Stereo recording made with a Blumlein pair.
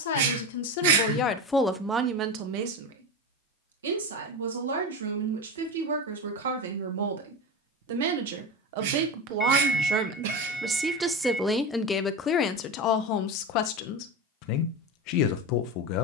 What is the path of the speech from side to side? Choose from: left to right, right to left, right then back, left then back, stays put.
right then back.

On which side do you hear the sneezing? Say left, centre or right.
right.